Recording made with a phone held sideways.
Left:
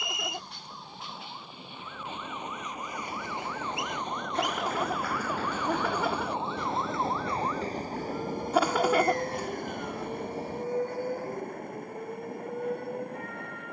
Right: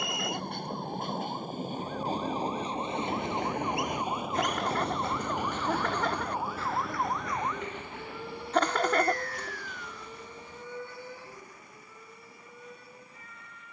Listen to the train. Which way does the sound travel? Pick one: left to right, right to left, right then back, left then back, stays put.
right to left.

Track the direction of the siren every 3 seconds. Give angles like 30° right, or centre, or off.
50° right, 30° right, centre, 40° left, 50° left.